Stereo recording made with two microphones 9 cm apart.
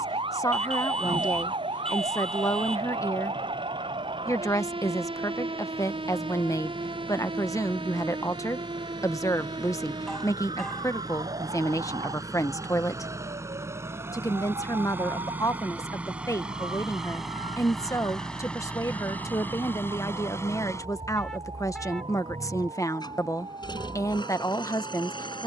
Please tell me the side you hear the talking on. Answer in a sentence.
In this clip you hear the talking on the left.